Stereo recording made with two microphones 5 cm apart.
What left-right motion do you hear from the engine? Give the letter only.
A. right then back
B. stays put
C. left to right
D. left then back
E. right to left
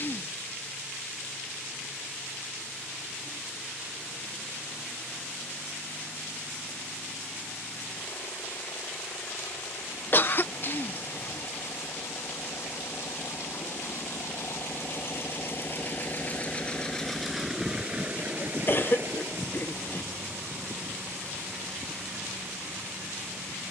C.